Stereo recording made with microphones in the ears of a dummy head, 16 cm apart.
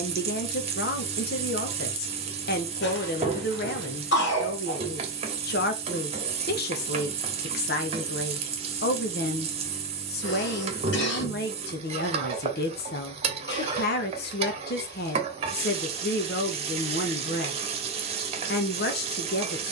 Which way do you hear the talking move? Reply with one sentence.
In this clip you hear the talking stay put.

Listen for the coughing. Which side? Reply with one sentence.
You can hear the coughing on the left.